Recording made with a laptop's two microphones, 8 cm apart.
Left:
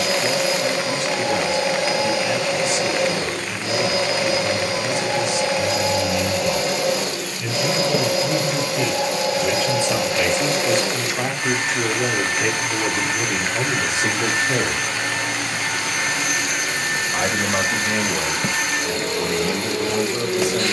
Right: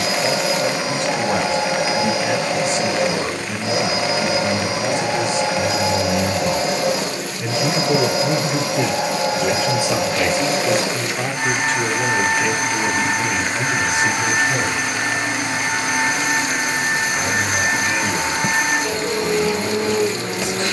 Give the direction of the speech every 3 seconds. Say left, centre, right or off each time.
right, right, right, centre, left, left, left.